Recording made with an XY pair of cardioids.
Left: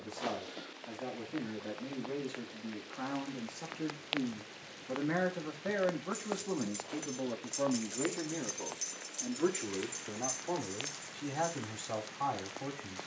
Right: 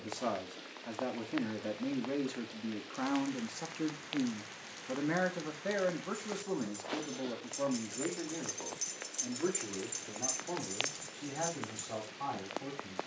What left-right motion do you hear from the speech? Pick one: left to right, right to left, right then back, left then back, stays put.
right to left.